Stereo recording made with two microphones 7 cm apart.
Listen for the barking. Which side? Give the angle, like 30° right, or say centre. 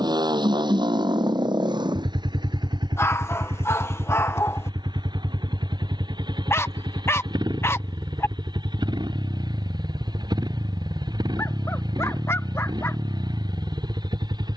40° left.